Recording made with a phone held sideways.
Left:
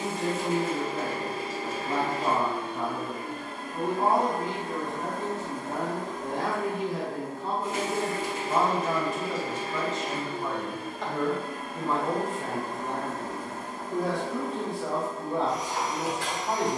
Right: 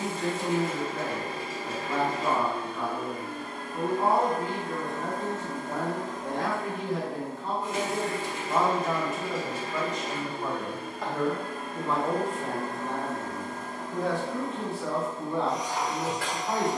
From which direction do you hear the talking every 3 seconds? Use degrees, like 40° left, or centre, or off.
20° left, 20° left, 10° left, 10° right, 10° left, 20° left.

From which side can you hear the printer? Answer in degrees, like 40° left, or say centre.
30° left.